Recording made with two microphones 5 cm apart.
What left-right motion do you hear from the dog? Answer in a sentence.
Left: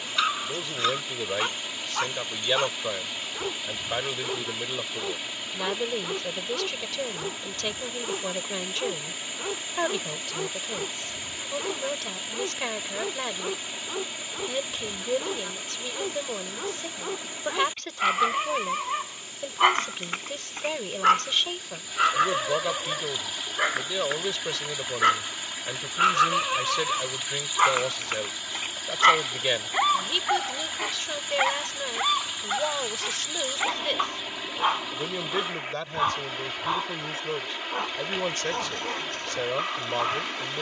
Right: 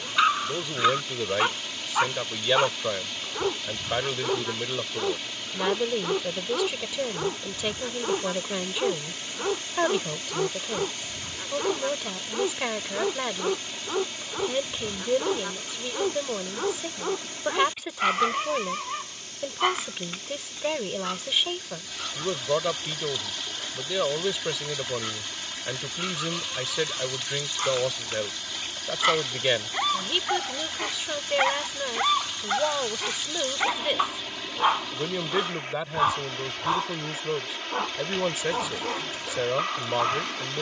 In this clip you hear the dog go left and come back.